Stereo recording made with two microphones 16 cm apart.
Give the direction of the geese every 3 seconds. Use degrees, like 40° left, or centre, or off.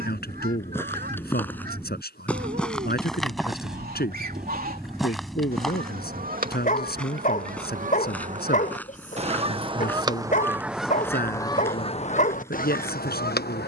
70° right, 60° right, 50° right, 10° right, 60° left.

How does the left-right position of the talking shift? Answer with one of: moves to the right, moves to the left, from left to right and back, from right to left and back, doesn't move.
doesn't move.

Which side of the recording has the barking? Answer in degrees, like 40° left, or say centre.
50° left.